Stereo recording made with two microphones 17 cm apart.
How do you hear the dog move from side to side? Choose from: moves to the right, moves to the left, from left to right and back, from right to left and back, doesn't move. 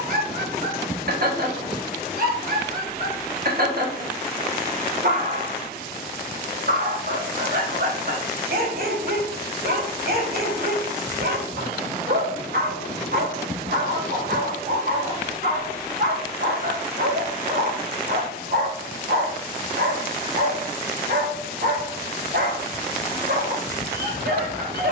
doesn't move.